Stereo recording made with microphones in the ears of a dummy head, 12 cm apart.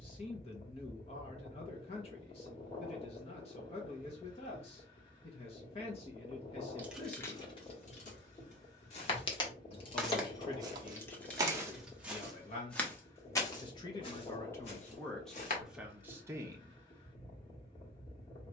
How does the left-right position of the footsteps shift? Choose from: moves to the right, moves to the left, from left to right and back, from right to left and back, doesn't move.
from left to right and back.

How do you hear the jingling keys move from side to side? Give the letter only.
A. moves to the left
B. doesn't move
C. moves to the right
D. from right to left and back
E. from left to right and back
D.